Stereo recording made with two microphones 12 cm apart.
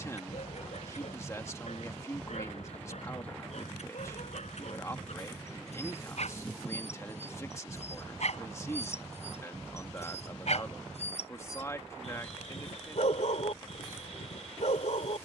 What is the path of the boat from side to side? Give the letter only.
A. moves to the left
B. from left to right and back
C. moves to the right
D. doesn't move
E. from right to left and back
D.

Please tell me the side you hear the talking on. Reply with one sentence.
You can hear the talking on the left.